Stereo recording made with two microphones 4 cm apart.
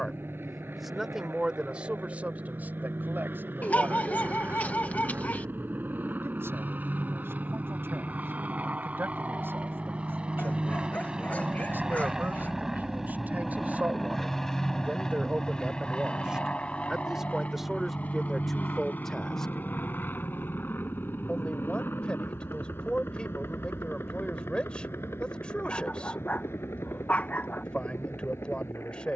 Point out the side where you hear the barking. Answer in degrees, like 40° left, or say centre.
40° left.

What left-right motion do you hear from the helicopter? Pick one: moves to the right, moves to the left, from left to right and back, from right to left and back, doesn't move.
moves to the left.